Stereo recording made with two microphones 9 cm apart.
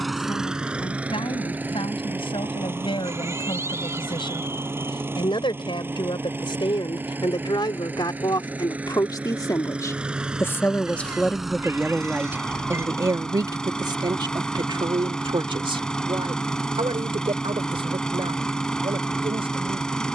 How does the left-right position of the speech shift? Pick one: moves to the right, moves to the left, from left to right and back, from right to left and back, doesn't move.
moves to the right.